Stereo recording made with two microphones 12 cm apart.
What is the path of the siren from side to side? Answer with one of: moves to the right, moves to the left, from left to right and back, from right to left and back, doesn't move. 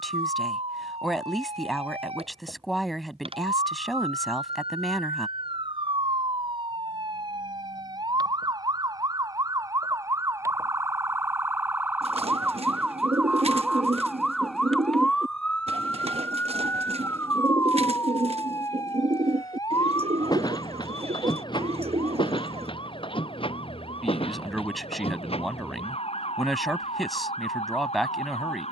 moves to the left.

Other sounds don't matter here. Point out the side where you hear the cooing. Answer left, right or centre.
right.